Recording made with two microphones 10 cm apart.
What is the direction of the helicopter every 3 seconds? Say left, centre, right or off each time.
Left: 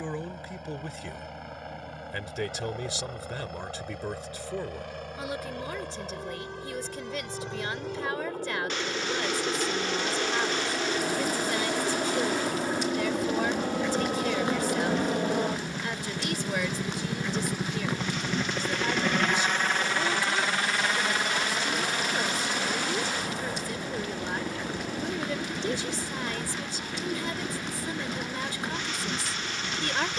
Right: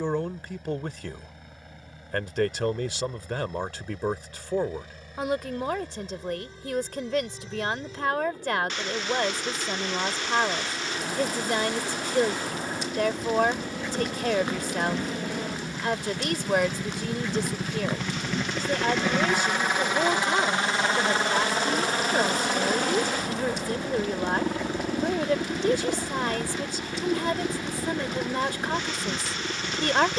left, left, left, left, left, left, centre, right, right, right.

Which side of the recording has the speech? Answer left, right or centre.
right.